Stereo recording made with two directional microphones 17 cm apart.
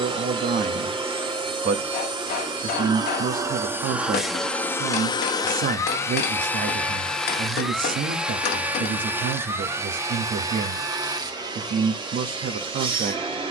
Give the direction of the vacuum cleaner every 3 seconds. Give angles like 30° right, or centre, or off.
30° right, centre, centre, 20° right, 30° right.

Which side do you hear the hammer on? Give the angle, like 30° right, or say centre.
70° left.